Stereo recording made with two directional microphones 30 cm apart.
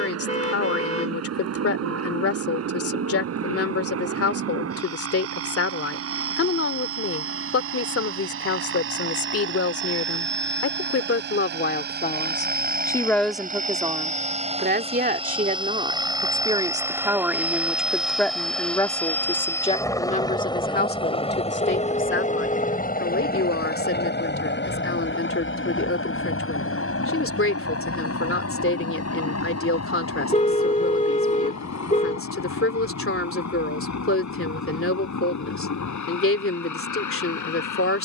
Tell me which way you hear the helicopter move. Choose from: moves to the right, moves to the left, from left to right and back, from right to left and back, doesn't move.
moves to the left.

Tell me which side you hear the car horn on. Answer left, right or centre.
left.